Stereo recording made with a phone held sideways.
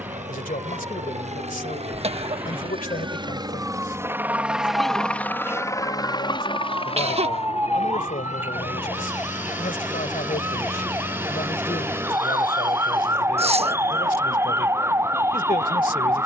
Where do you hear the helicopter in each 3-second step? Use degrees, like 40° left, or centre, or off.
60° right, 10° right, 50° left, 60° left, 70° left, 70° left.